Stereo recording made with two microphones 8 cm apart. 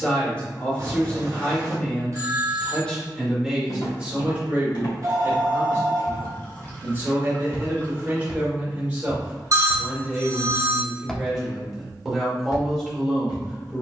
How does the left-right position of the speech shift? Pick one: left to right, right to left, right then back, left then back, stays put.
right then back.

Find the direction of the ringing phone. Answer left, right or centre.
right.